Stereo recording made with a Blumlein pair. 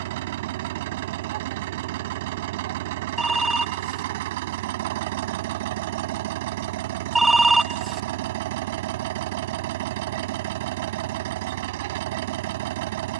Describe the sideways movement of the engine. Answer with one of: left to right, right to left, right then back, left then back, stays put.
stays put.